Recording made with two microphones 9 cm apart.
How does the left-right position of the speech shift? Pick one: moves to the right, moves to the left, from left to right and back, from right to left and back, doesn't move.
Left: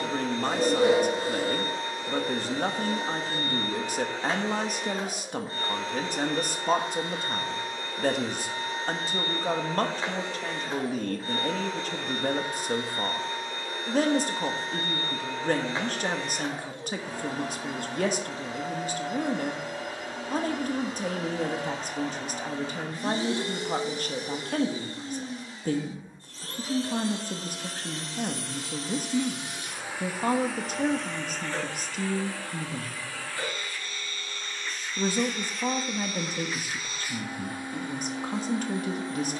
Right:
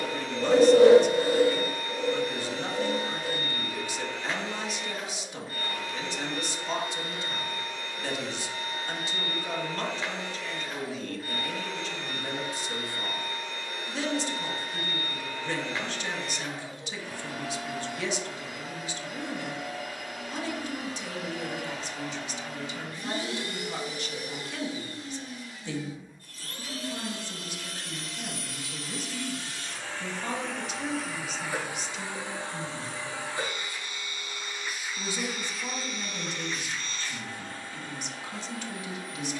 doesn't move.